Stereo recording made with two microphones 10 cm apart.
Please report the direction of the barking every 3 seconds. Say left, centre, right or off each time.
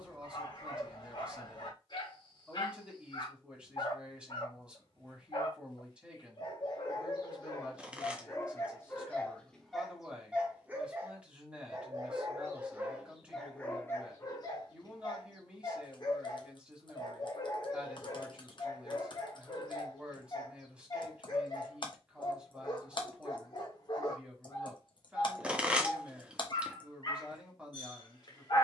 left, left, left, centre, centre, left, left, left, left, left.